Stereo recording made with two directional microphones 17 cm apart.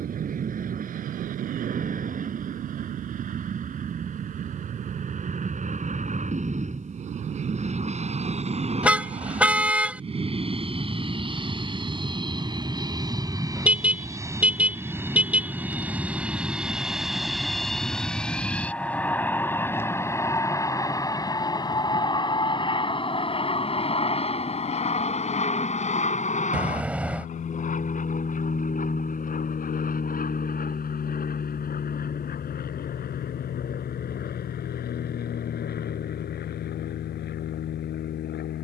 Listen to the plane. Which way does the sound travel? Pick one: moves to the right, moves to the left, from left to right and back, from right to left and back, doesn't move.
moves to the left.